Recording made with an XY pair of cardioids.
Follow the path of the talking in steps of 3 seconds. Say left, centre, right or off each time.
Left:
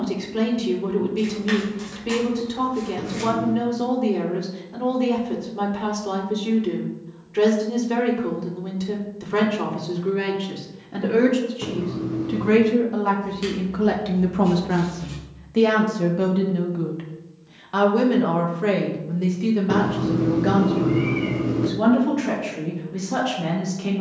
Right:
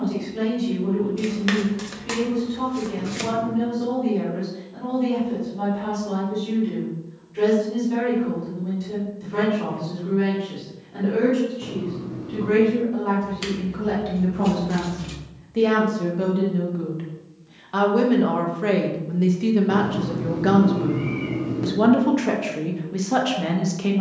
left, left, left, left, left, left, centre, right.